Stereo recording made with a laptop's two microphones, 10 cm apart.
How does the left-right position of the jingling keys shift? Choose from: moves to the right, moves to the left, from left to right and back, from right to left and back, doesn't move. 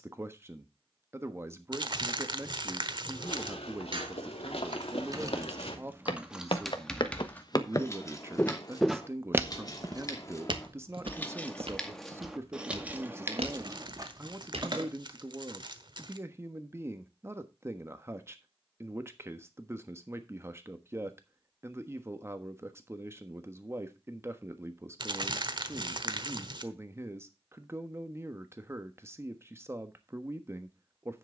from right to left and back.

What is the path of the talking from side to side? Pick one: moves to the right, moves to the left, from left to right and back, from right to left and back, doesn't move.
doesn't move.